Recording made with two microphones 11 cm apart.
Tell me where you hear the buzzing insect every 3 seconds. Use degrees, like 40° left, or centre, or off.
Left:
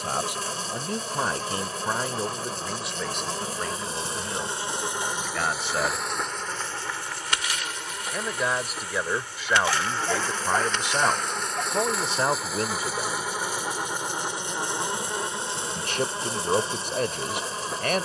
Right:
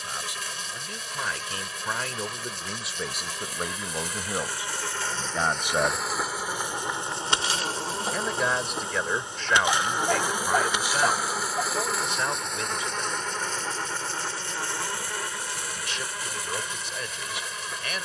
40° left, 20° left, 20° right, 10° right, 10° left, 30° left.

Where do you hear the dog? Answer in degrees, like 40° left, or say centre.
10° right.